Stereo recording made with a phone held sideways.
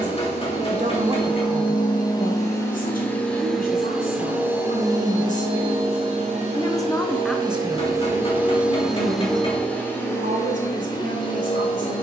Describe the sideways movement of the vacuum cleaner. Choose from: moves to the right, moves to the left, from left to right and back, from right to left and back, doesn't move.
from left to right and back.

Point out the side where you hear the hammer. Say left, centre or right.
left.